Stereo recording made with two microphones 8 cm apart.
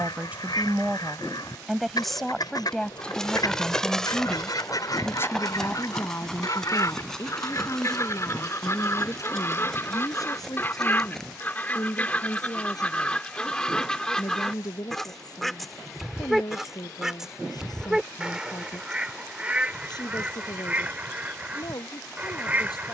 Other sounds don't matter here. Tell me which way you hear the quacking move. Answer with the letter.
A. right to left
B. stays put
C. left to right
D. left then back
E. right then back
C.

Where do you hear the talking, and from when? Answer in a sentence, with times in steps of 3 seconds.
In this clip you hear the talking in the centre from 0 s and on the left from 3 s.